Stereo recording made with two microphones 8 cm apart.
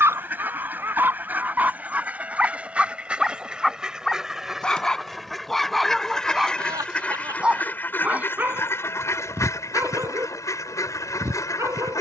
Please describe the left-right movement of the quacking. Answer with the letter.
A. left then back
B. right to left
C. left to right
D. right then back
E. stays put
B.